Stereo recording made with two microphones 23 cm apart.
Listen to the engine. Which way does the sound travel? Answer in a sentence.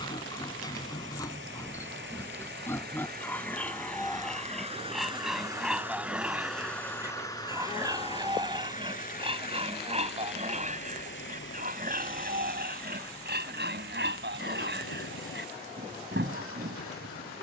In this clip you hear the engine go from the right side to the left.